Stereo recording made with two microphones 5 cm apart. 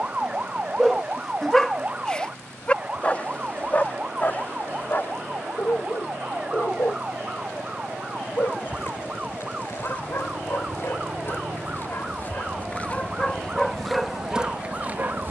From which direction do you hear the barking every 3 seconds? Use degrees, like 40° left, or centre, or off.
centre, 40° left, 50° left, 50° left, 10° left.